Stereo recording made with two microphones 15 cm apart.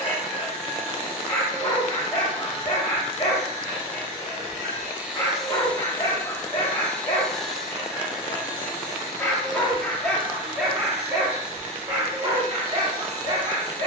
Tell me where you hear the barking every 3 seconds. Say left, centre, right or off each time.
left, left, left, centre, right.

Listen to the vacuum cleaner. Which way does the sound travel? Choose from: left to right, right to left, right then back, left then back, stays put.
left then back.